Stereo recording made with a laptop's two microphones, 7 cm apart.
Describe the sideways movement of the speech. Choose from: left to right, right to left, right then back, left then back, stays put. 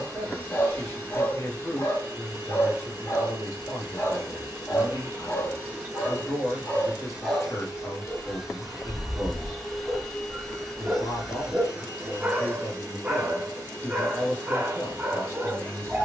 stays put.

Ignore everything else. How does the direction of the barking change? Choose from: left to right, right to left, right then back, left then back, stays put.
left to right.